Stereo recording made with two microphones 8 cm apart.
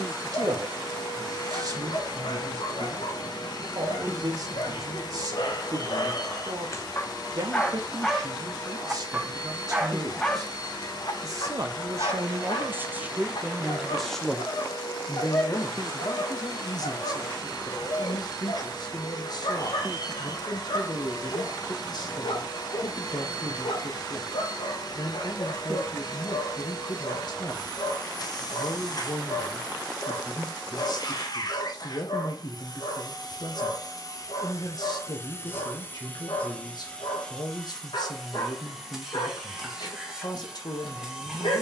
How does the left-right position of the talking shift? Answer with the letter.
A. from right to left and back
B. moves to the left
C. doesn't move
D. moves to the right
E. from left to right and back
B.